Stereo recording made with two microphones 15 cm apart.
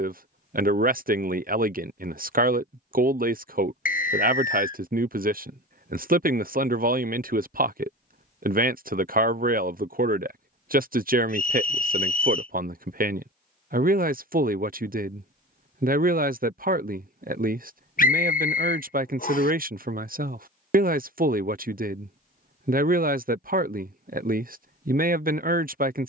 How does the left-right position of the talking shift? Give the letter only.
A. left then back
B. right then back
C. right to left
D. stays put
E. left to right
D.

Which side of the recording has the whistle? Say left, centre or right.
left.